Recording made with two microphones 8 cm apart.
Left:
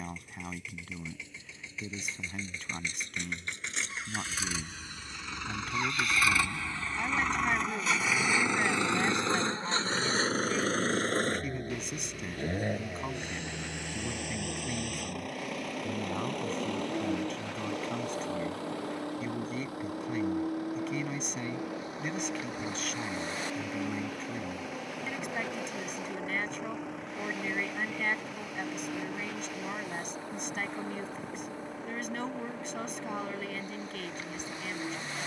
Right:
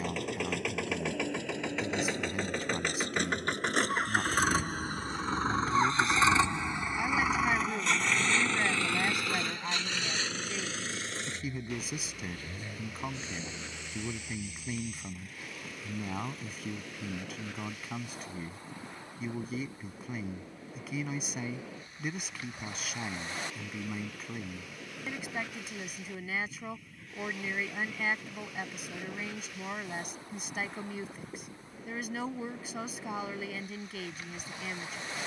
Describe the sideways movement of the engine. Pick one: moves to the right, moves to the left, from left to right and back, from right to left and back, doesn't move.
moves to the left.